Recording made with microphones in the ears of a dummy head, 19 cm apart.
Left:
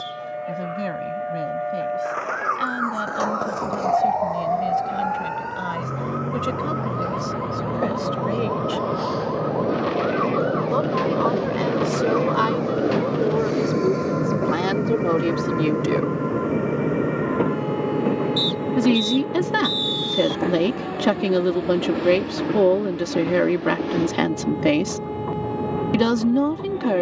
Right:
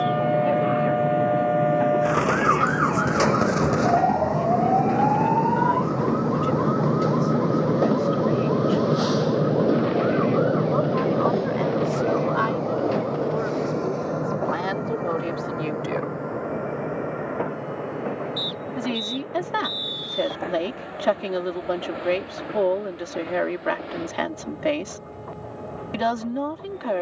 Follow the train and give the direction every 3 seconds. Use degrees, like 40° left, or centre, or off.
70° right, 60° right, 40° right, centre, 20° left, 40° left, 50° left, 60° left, 60° left.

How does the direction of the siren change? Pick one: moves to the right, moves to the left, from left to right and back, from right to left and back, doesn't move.
moves to the left.